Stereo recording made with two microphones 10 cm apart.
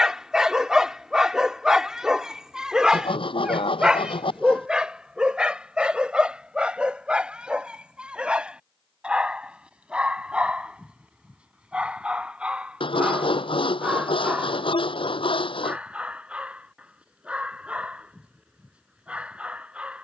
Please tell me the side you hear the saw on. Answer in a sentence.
In this clip you hear the saw on the left.